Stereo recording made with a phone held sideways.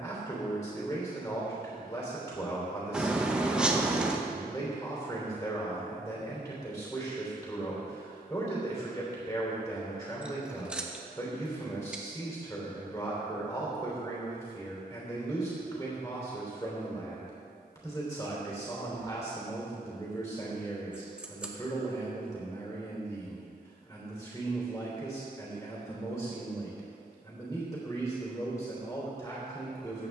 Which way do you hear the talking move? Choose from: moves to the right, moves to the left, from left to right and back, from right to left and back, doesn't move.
doesn't move.